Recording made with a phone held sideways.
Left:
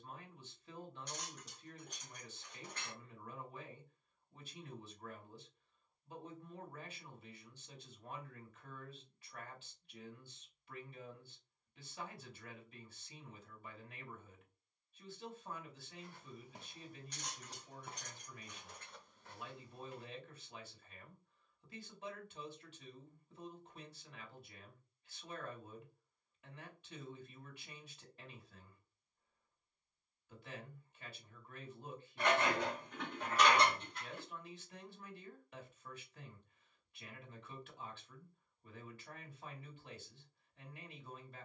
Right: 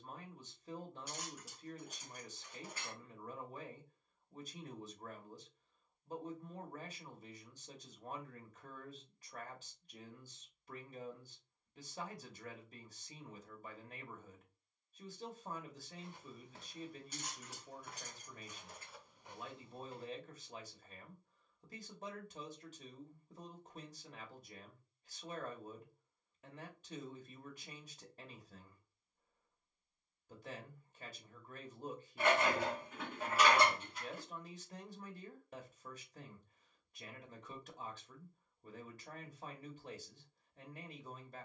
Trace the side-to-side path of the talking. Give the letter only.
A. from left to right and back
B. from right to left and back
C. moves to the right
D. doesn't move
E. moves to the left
D.